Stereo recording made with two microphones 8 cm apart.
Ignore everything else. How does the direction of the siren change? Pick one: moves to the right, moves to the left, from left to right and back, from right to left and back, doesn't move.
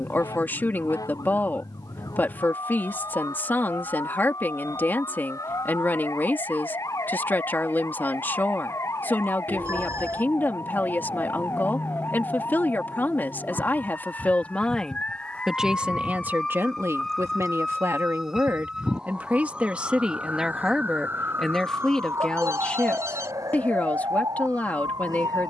moves to the right.